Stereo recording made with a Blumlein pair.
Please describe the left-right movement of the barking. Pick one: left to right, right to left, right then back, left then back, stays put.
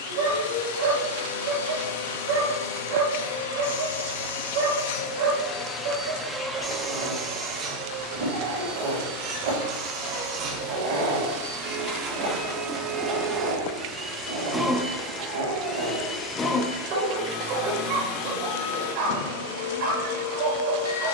stays put.